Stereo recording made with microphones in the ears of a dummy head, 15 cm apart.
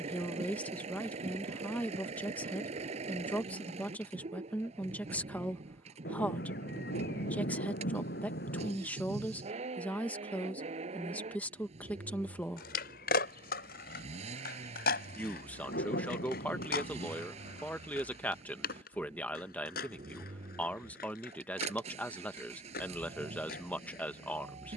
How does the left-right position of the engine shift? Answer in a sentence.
You can hear the engine stay in one place.